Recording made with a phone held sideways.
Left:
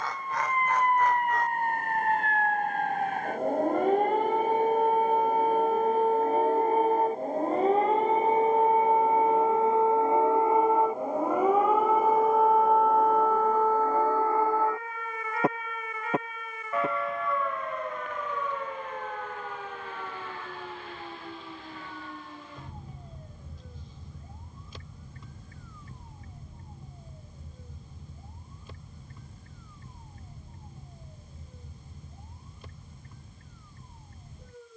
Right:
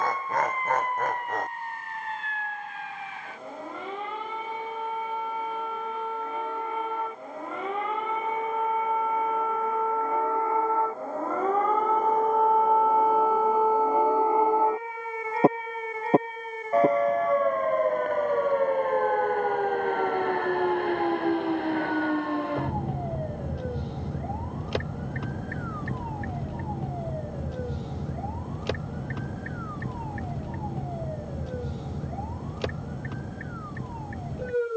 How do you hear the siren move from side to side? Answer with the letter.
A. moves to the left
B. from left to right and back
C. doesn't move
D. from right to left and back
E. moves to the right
E.